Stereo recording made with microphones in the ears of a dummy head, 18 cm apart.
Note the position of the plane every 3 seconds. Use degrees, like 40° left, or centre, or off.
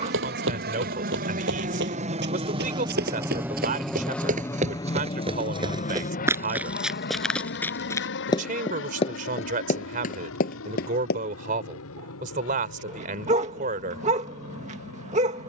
40° right, 10° left, 50° left, 70° left, 70° left.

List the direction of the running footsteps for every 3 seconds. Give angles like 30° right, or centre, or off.
60° right, 40° right, centre, 40° left, off.